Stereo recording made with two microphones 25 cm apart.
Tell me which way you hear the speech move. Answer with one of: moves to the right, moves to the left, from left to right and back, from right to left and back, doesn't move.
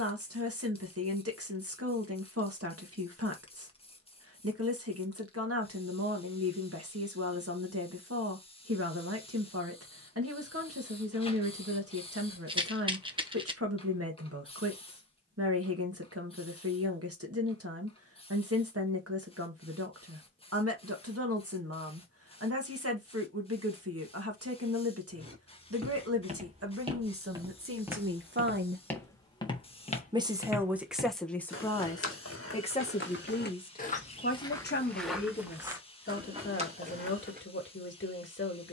moves to the left.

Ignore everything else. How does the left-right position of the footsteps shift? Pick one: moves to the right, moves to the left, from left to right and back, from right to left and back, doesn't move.
from right to left and back.